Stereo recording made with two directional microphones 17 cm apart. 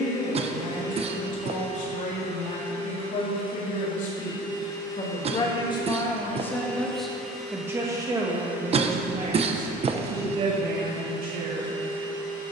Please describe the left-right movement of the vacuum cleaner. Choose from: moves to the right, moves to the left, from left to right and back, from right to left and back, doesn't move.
moves to the right.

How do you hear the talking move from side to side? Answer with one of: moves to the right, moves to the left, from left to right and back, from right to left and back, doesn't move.
moves to the right.